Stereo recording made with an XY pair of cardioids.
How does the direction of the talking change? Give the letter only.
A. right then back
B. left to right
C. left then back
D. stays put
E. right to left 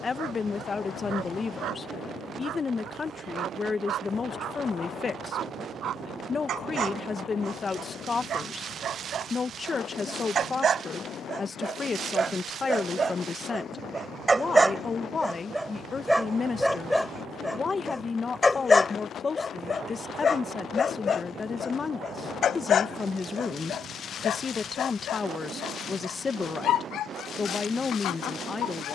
D.